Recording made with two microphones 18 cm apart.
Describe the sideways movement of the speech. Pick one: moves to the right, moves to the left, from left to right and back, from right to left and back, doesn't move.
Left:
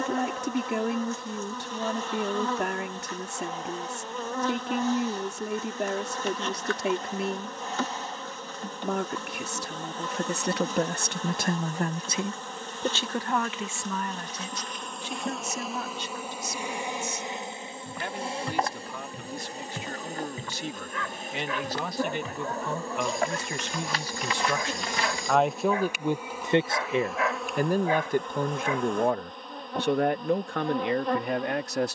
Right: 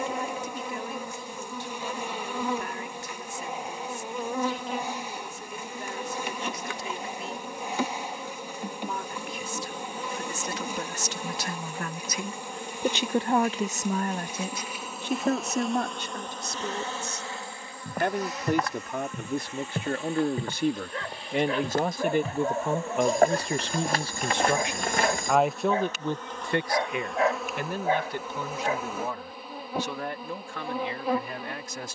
from left to right and back.